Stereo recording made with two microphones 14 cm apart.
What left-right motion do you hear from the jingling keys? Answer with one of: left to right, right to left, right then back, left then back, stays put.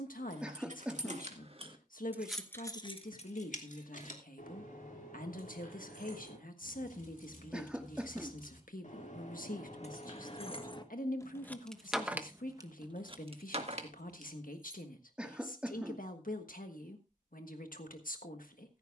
left then back.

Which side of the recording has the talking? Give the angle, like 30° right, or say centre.
80° left.